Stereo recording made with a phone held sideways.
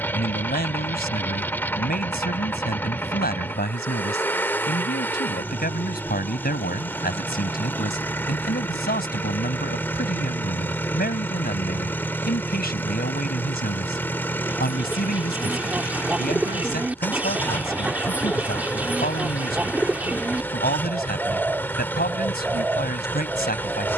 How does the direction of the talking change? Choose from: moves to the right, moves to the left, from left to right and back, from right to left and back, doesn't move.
doesn't move.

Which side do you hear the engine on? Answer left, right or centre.
centre.